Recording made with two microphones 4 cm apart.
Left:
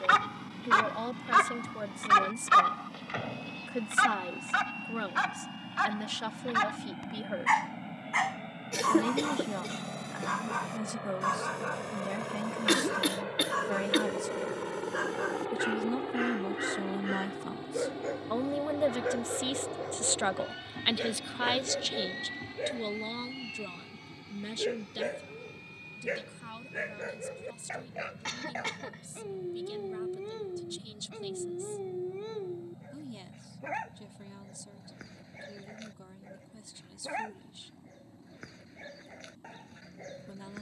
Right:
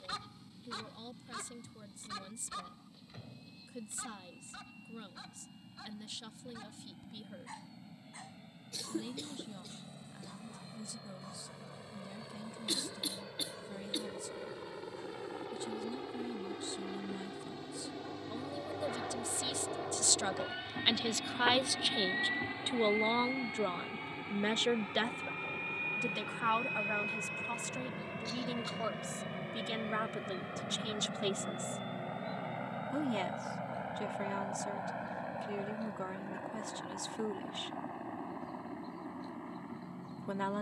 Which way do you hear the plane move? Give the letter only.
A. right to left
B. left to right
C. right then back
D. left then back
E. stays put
B.